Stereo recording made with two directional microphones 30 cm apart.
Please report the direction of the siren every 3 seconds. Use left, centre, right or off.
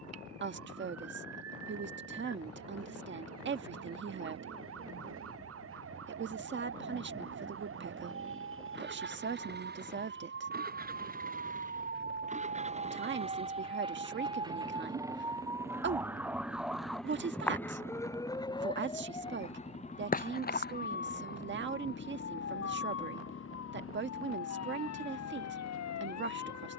right, right, right, right, right, centre, left, left, left.